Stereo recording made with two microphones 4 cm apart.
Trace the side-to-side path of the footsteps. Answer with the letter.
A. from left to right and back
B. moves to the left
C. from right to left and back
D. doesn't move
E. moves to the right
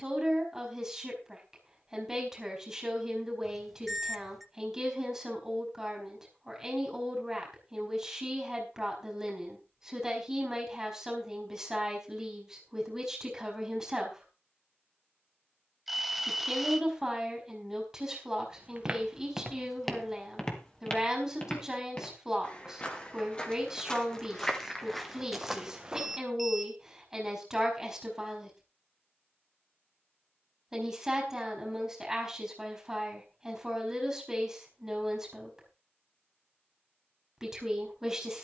C.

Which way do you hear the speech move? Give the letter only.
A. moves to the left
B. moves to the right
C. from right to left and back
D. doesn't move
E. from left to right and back
D.